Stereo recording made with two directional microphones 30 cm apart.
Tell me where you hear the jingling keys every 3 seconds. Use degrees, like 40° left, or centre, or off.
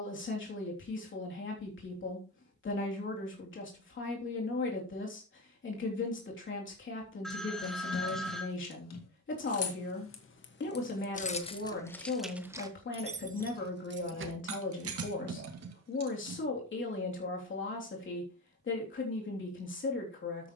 off, off, 60° left, 30° left, 30° right, 60° right, off.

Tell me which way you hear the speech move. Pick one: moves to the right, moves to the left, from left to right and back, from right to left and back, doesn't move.
doesn't move.